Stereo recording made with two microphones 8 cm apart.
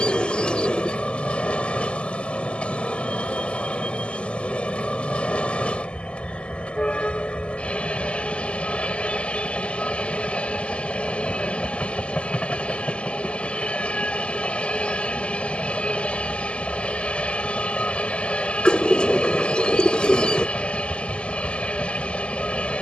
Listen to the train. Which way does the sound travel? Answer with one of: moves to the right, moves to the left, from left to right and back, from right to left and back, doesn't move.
doesn't move.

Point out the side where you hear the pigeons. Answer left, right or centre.
centre.